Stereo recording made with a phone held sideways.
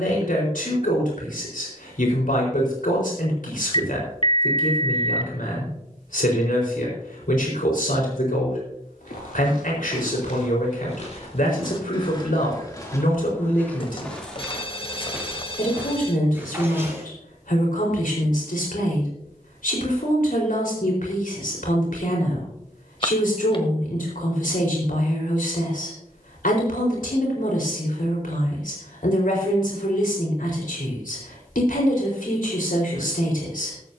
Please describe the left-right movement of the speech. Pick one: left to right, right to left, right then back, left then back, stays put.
stays put.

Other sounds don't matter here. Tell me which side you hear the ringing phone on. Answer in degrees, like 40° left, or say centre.
40° left.